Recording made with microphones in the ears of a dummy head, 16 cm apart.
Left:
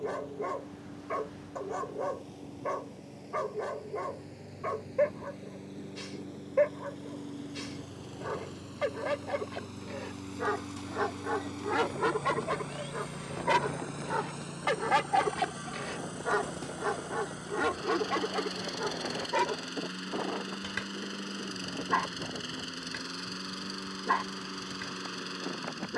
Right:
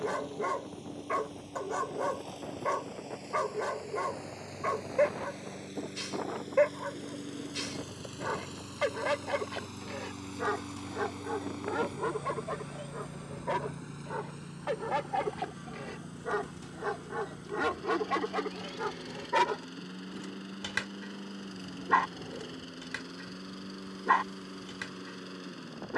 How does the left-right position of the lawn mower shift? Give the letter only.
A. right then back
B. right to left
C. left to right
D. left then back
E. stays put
B.